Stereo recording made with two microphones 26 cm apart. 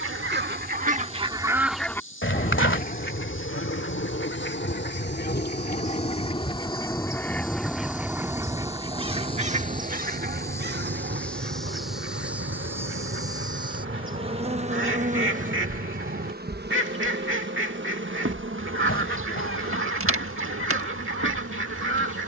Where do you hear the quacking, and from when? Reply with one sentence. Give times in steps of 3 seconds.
You can hear the quacking in the centre from 0 s, on the left from 3 s, in the centre from 6 s and on the right from 9 s.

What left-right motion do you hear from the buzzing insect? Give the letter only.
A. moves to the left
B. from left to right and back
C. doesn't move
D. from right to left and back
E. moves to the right
E.